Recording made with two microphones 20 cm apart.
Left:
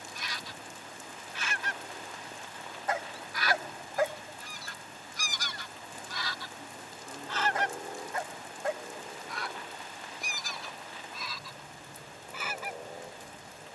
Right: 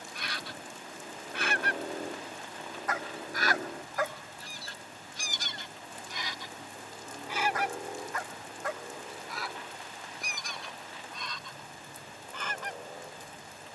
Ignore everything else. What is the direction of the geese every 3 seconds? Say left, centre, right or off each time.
right, right, centre, centre, centre.